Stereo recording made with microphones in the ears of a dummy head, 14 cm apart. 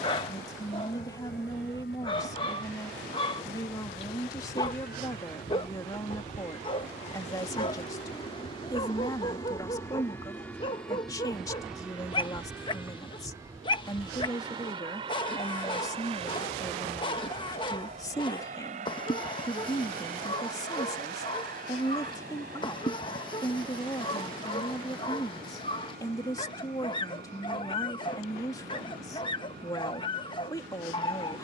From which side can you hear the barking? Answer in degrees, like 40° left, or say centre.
30° left.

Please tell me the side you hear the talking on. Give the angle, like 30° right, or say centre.
20° left.